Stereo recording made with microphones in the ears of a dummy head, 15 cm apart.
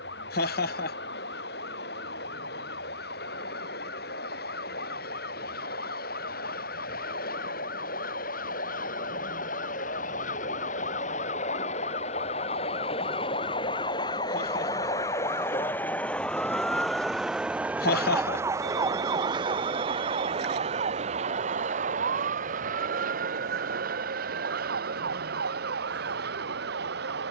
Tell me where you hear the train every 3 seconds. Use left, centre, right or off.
left, left, left, left, left, centre, right, right, right.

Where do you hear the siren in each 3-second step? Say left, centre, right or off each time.
left, left, left, left, left, centre, right, right, right.